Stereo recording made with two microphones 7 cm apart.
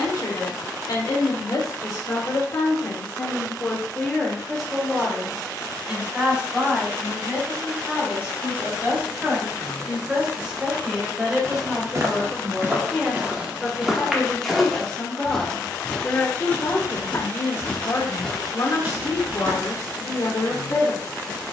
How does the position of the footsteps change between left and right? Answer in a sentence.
You can hear the footsteps go left and come back.